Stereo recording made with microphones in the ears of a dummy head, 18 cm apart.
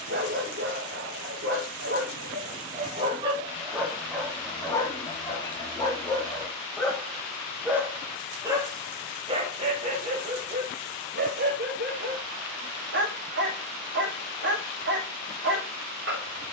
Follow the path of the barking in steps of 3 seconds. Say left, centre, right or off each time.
right, centre, centre, right, right, right.